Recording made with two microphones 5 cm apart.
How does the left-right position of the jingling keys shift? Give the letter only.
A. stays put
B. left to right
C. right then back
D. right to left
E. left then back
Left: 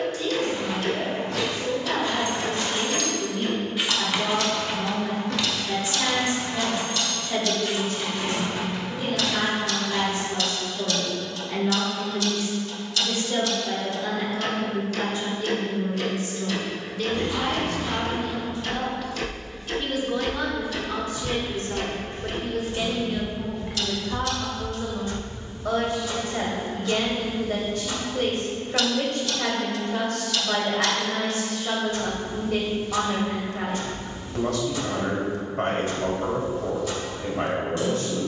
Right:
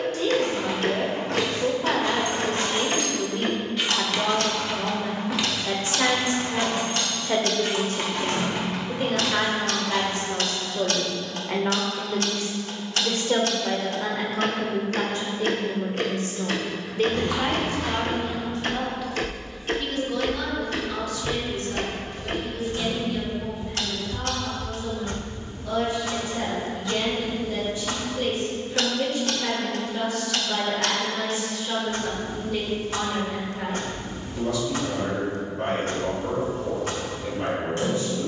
E.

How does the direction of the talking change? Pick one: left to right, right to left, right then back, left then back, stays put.
right to left.